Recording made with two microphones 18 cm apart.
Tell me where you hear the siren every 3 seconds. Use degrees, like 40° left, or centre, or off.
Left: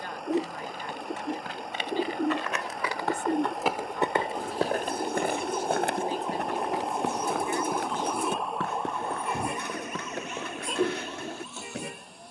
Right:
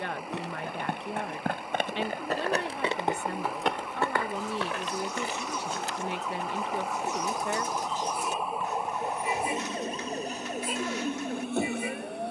50° left, 40° left, 10° left, 40° right.